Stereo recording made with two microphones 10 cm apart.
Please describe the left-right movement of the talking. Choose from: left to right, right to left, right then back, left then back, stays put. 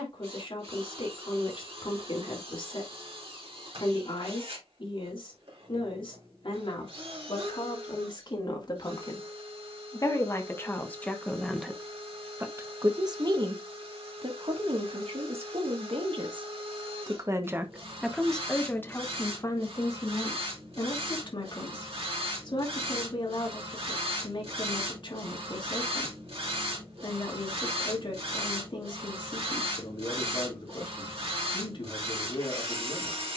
right then back.